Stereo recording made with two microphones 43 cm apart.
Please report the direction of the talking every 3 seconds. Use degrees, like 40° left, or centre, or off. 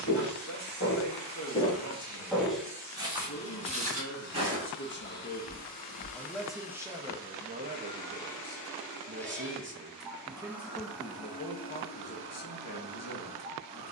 40° left, 30° left, 10° right, centre, 40° left.